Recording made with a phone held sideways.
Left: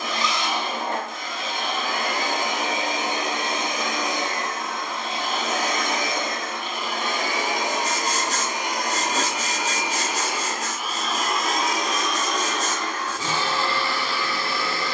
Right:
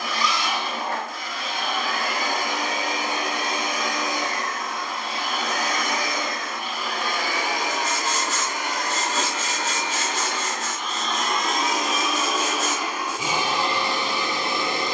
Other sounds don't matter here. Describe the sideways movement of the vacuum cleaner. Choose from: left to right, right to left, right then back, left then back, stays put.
left to right.